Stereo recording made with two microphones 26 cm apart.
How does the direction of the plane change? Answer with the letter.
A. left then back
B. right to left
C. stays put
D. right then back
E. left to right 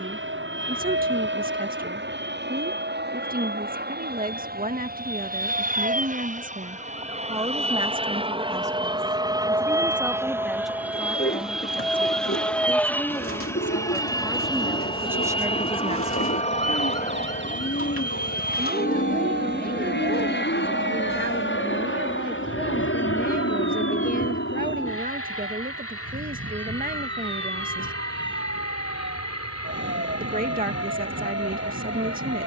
B.